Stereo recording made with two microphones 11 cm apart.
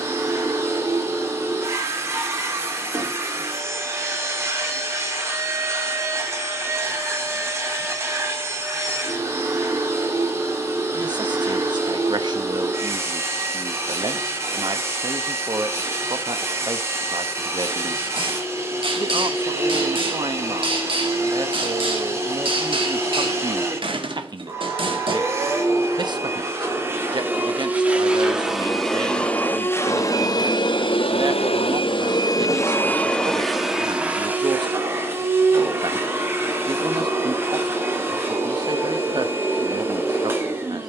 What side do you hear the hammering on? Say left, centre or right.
right.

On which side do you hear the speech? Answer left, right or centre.
right.